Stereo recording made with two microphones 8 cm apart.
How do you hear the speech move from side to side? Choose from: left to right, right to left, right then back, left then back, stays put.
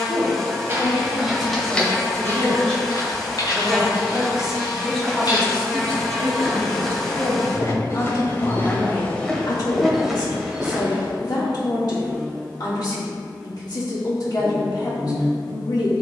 right then back.